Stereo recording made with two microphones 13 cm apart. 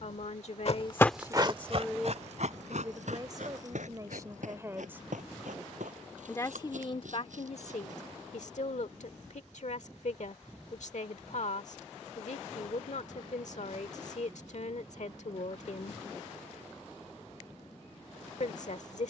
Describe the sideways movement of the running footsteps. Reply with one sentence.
You can hear the running footsteps travel towards the right.